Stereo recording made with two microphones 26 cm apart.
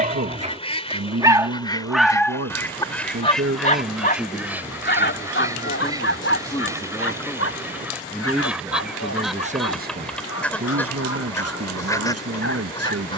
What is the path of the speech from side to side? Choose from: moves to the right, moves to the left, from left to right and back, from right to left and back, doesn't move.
from right to left and back.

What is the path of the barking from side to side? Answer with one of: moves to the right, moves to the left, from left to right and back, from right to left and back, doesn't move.
moves to the left.